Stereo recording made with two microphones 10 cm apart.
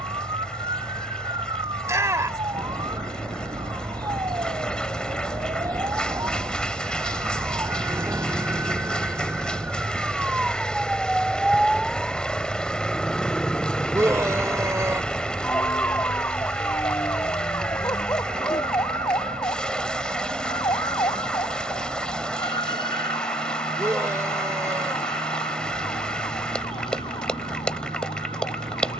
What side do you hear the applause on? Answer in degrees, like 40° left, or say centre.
10° left.